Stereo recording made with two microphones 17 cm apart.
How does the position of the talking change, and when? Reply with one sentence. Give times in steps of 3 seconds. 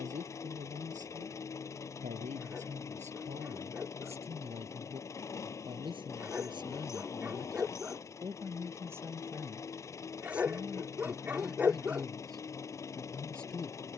In this clip you hear the talking on the right from 0 s and in the centre from 9 s.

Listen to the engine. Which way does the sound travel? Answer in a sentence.
You can hear the engine stay put.